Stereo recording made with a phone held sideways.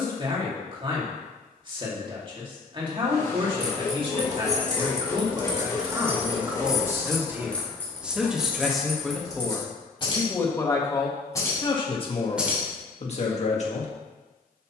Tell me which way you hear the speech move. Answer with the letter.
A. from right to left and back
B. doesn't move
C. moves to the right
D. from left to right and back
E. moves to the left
E.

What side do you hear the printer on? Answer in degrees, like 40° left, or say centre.
20° left.